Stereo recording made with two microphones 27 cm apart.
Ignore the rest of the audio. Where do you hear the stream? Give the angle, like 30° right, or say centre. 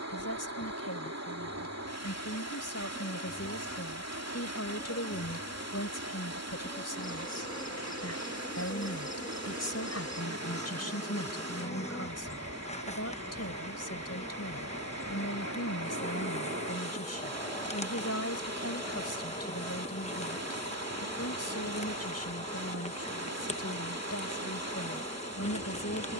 70° right.